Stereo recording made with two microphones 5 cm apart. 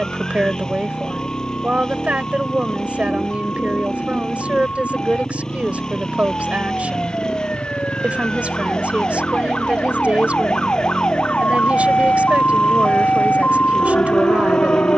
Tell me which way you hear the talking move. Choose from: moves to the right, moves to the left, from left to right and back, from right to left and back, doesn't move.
doesn't move.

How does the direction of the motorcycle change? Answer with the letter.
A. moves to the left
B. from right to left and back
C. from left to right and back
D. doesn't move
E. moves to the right
D.